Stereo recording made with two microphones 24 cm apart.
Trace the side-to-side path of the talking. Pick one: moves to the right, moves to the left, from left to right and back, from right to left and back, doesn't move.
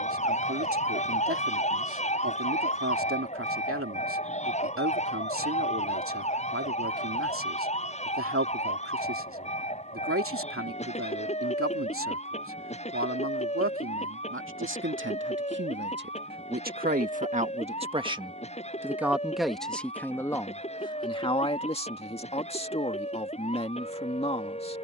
moves to the left.